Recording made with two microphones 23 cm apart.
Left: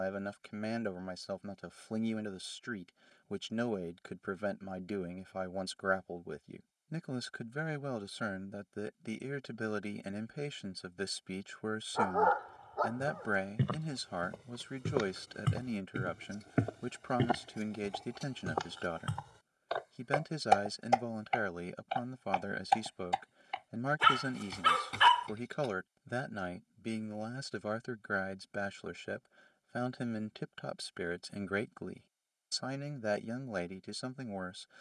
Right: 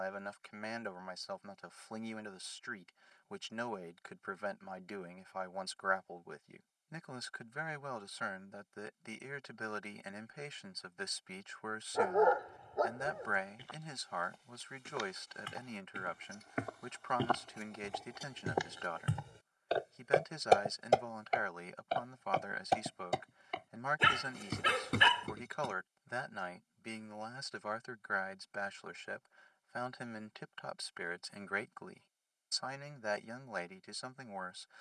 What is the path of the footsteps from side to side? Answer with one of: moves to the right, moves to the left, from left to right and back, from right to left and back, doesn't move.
moves to the right.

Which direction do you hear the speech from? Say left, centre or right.
left.